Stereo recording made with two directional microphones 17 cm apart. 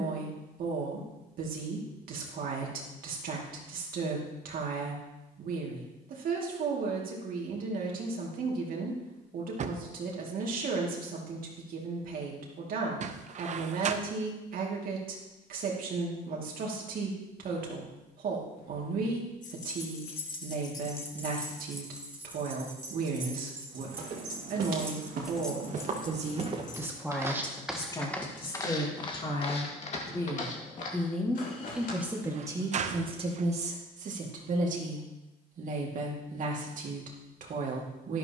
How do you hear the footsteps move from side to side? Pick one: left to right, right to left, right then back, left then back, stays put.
right to left.